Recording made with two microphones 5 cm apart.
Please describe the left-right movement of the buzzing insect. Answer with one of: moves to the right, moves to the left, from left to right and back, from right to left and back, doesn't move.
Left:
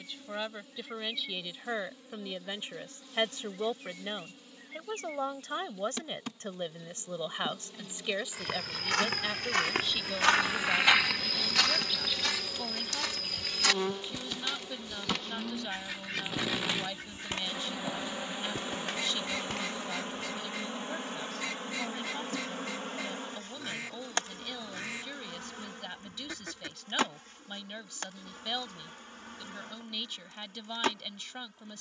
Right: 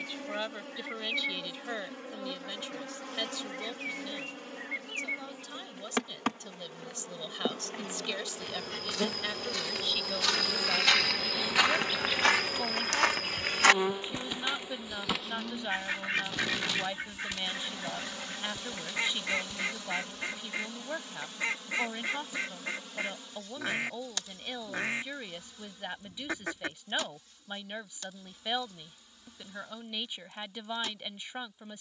moves to the left.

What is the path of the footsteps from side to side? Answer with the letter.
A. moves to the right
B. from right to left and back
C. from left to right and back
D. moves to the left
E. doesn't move
C.